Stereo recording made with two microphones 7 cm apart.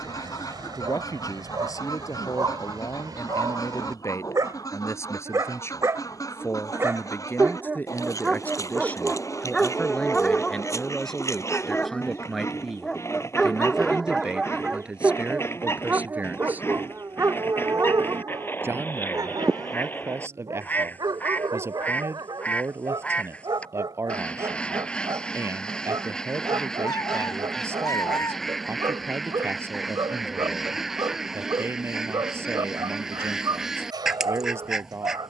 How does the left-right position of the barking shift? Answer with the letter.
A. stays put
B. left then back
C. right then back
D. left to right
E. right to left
B.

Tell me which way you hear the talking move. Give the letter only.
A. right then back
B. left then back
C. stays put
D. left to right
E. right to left
D.